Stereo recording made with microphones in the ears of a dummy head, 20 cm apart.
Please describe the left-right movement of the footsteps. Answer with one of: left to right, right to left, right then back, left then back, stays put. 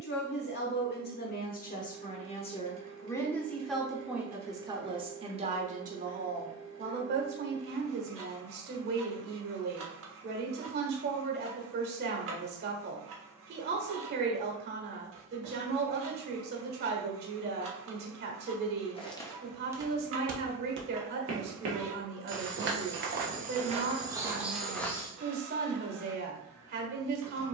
right then back.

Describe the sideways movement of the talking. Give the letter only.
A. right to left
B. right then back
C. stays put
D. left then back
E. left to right
E.